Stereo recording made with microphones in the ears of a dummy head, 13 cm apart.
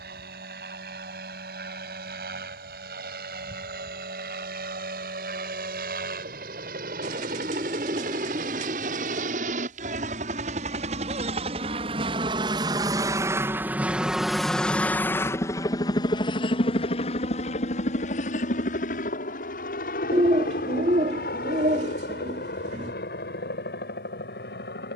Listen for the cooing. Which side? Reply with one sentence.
In this clip you hear the cooing on the right.